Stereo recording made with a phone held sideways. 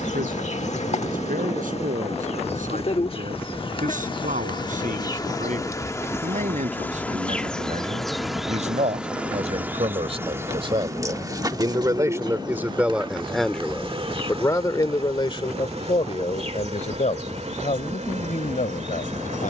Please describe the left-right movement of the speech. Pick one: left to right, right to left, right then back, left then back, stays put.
right to left.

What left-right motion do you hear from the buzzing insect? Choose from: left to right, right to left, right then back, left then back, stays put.
left to right.